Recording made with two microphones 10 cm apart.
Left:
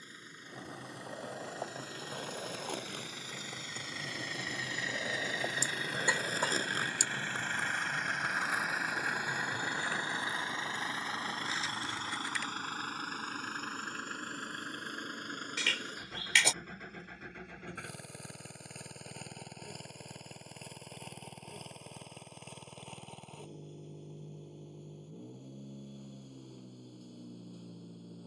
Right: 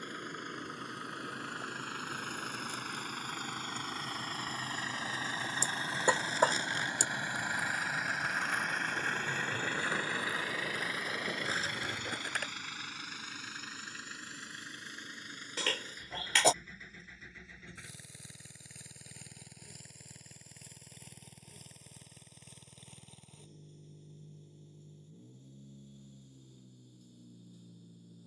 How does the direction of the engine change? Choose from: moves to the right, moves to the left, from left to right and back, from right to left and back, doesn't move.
moves to the left.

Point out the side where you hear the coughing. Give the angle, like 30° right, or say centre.
40° right.